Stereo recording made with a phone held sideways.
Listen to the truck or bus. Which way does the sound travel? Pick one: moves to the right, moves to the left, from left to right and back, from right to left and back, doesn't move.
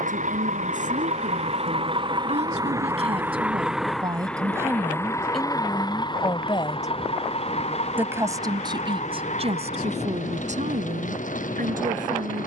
moves to the left.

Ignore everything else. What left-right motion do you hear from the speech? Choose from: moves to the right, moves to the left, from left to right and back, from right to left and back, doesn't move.
from right to left and back.